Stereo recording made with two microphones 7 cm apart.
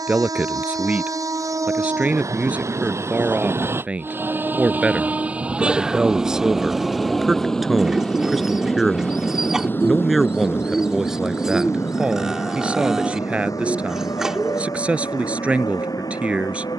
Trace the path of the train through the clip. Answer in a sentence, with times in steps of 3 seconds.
You can hear the train on the right from 0 s, in the centre from 6 s and on the left from 9 s.